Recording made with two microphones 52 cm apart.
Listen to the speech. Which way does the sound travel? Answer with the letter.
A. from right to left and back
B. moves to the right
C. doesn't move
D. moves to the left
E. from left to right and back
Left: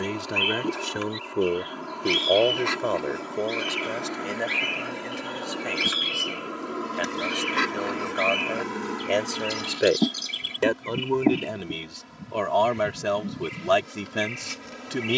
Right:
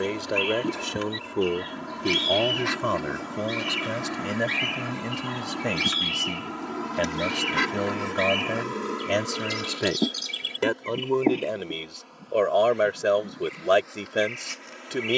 E.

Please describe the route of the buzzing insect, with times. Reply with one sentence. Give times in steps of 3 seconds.
You can hear the buzzing insect on the right from 0 s, in the centre from 6 s and on the left from 9 s.